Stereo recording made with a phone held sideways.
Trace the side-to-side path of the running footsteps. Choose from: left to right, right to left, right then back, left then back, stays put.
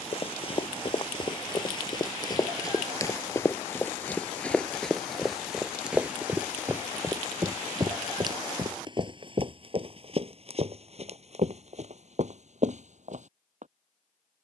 left to right.